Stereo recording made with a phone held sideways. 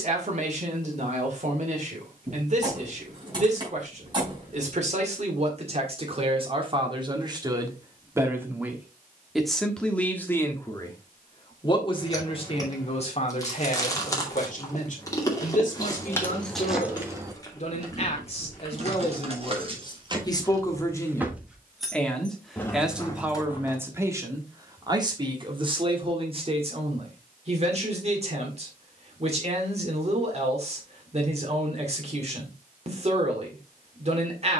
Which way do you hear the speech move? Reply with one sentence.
In this clip you hear the speech move from right to left and back again.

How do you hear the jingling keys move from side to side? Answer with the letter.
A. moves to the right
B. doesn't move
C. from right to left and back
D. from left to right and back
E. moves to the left
D.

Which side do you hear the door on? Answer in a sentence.
In this clip you hear the door on the right.